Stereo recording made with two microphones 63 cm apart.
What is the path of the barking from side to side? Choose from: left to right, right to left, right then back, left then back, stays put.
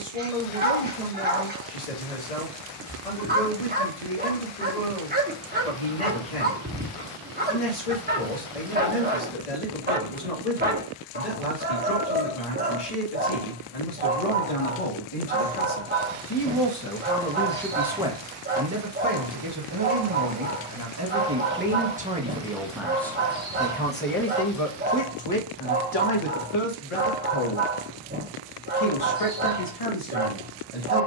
stays put.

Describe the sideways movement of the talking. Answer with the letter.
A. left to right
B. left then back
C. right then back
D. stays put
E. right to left
C.